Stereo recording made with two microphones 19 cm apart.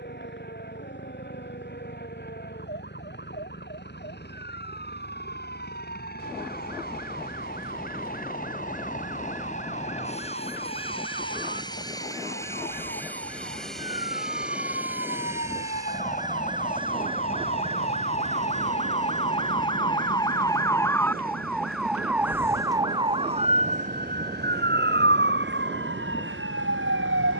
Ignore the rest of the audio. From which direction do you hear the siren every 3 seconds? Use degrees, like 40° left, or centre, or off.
60° left, 60° left, 60° left, 50° left, 50° left, 40° left, 30° left, 10° right, 60° right.